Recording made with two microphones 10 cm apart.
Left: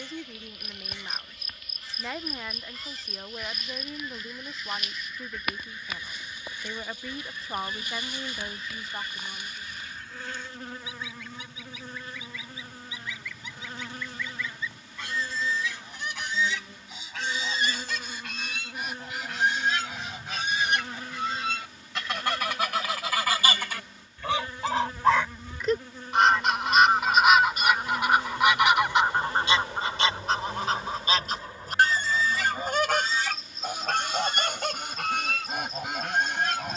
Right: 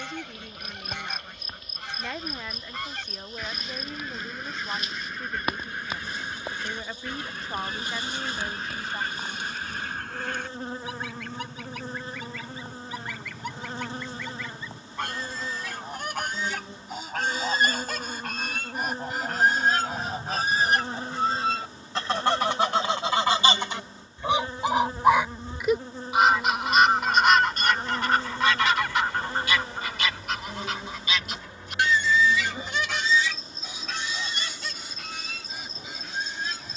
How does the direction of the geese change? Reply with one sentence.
You can hear the geese move from right to left.